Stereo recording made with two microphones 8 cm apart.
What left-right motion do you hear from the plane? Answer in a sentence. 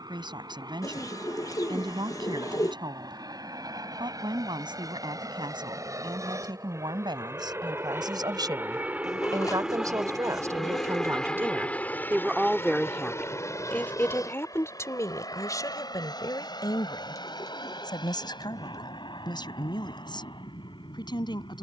You can hear the plane move to the left.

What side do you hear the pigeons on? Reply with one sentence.
In this clip you hear the pigeons on the left.